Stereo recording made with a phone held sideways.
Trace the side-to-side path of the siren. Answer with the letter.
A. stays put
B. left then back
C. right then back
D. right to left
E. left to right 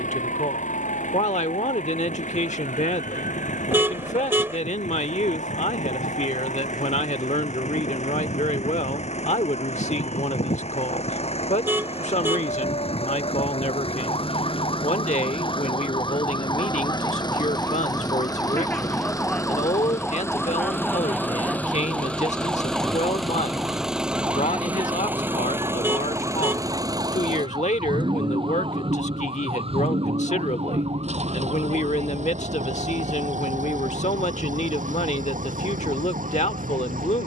E.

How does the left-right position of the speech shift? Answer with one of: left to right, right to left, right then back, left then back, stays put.
stays put.